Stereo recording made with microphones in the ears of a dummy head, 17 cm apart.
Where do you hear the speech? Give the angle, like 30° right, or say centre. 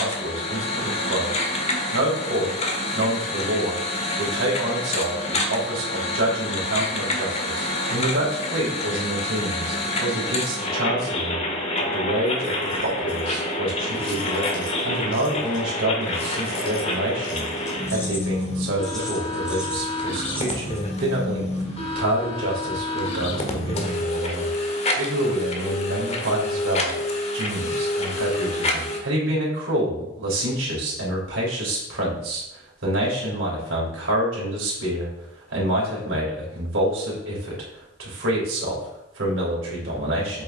70° right.